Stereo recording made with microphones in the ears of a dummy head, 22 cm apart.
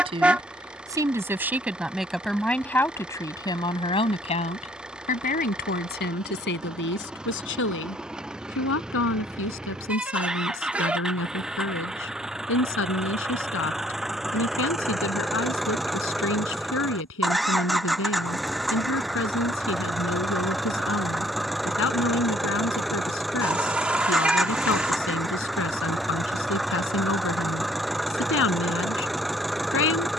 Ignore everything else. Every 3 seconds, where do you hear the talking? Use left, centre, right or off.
centre, left, left, left, left, left, left, left, left, left.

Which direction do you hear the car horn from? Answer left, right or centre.
centre.